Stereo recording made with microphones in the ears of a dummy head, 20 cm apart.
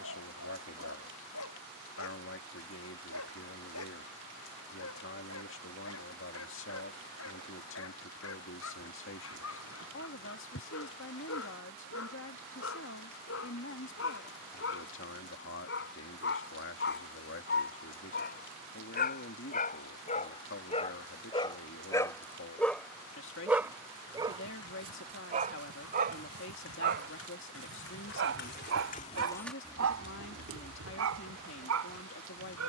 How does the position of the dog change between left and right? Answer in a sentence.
In this clip you hear the dog travel towards the right.